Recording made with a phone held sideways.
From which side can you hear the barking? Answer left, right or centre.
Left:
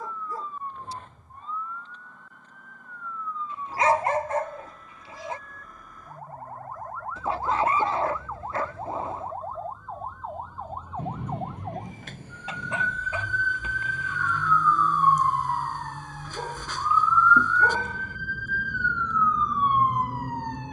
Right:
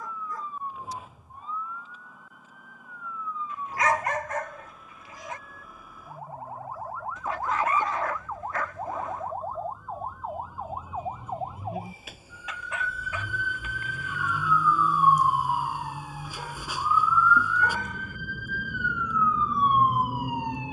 left.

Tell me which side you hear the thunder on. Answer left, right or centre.
left.